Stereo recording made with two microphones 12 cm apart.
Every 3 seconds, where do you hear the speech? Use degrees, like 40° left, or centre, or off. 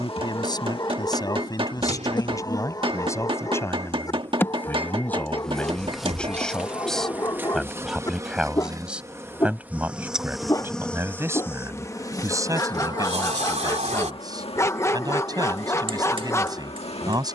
30° left, 20° left, centre, 20° right, 30° right, 30° right.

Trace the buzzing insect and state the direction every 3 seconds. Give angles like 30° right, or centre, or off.
40° left, 10° left, 20° right, centre, 40° left, 50° left.